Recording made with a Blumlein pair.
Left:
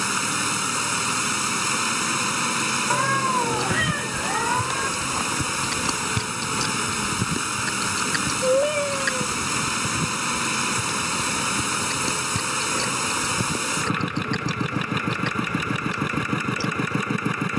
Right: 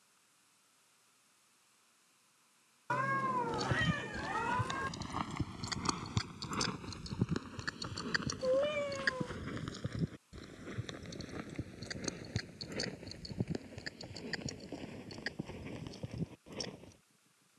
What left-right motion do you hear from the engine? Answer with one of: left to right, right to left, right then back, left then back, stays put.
stays put.